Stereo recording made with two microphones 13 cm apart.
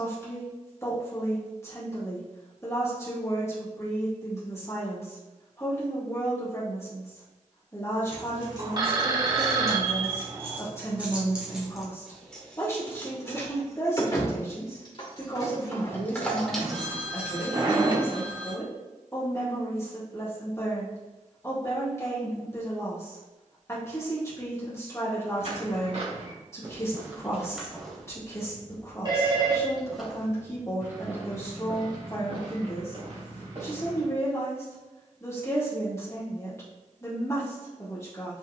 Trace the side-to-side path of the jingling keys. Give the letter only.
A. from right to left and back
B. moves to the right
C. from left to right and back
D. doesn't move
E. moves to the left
A.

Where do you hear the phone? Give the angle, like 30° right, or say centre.
30° right.